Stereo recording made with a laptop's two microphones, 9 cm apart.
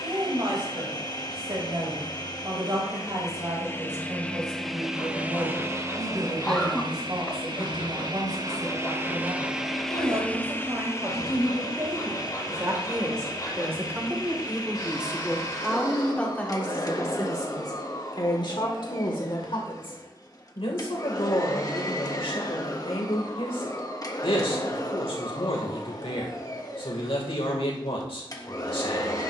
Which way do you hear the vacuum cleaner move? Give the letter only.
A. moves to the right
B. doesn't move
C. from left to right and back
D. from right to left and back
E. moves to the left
C.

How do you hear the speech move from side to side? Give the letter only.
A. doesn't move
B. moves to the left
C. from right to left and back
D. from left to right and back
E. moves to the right
B.